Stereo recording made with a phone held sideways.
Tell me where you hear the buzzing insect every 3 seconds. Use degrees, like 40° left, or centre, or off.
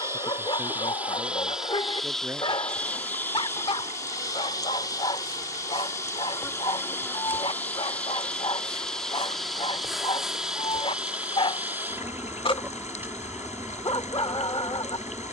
10° right, 30° left, 20° left, 10° right, 20° right.